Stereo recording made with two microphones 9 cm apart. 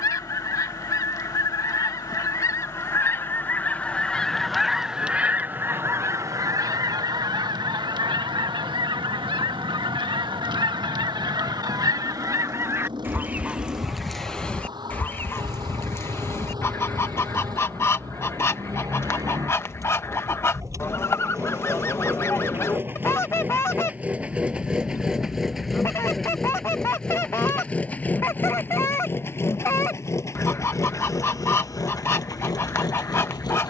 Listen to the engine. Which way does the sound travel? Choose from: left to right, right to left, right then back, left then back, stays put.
right to left.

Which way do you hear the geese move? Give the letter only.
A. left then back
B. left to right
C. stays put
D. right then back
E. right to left
D.